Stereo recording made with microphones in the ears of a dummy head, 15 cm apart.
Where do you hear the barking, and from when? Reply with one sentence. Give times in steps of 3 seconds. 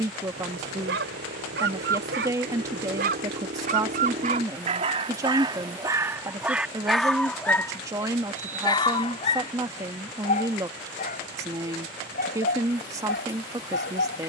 In this clip you hear the barking on the right from 0 s, in the centre from 6 s and on the left from 9 s.